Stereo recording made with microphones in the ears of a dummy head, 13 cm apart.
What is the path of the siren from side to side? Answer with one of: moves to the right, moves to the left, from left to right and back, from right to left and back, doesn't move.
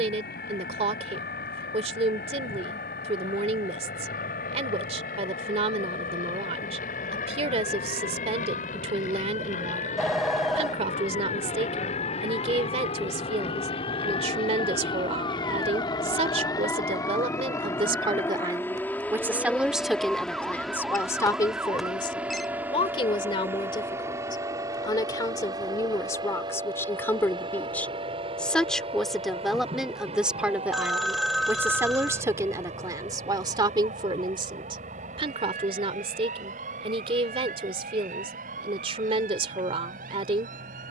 moves to the right.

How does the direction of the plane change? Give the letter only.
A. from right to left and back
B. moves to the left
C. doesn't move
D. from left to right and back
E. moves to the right
E.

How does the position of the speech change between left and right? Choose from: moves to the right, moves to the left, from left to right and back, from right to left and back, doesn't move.
from right to left and back.